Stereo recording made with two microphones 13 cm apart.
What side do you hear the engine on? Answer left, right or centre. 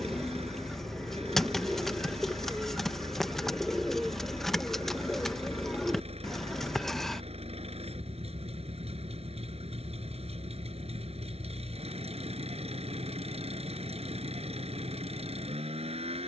right.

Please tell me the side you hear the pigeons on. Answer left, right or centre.
centre.